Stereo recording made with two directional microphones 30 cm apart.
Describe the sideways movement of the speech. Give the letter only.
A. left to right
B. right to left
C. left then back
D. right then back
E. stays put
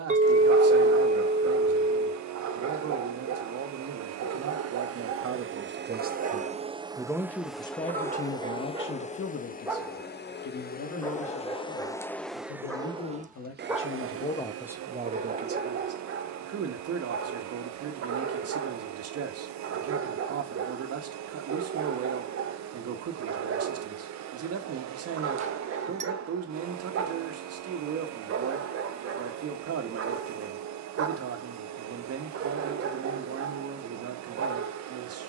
C.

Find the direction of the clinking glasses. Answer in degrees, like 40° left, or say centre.
20° right.